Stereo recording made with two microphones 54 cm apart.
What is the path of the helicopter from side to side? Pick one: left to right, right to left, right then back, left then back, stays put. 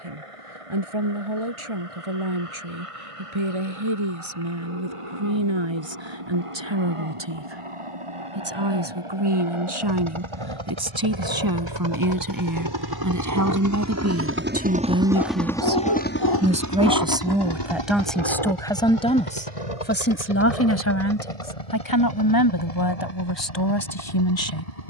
right to left.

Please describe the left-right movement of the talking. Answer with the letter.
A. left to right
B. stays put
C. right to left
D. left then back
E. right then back
C.